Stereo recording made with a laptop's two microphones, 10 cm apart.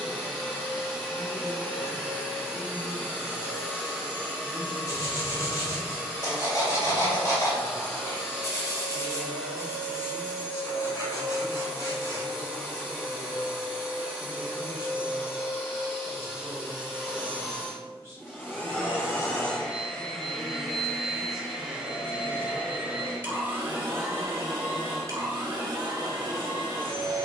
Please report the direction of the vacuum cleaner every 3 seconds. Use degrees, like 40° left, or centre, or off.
20° left, 20° left, 20° left, 20° left, 20° left, 20° left, 10° left, 10° right, 40° right.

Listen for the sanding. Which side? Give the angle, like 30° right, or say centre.
40° left.